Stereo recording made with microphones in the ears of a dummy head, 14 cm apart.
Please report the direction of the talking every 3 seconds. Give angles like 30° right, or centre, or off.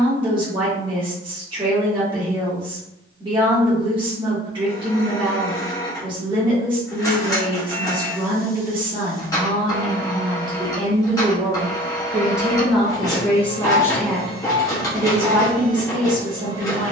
30° right, 30° right, 30° right, 30° right, centre, 30° right.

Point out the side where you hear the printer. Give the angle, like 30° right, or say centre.
20° left.